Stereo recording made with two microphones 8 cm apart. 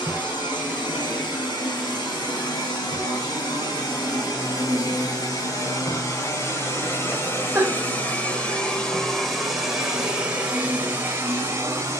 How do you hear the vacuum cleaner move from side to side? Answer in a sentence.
In this clip you hear the vacuum cleaner travel towards the right.